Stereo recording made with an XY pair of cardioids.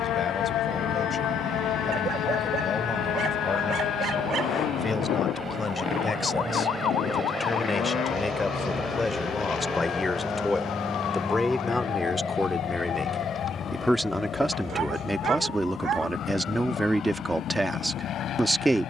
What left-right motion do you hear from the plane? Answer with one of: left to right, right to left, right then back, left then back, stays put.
right to left.